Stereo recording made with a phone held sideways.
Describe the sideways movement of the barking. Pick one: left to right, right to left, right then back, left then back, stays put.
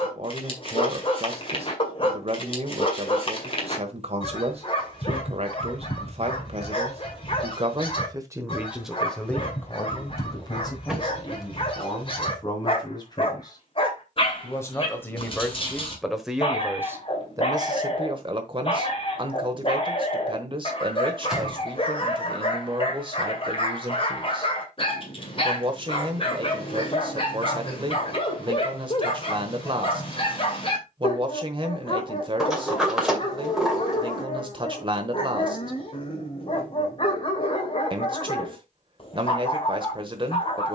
stays put.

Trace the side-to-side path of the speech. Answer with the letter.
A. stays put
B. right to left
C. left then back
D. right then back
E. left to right
C.